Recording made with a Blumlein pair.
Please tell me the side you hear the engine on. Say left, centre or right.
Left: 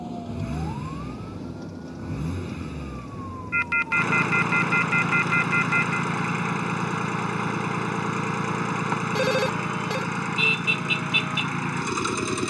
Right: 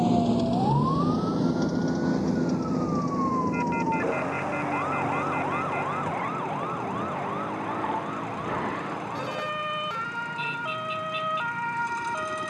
left.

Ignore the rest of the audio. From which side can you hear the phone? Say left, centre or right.
left.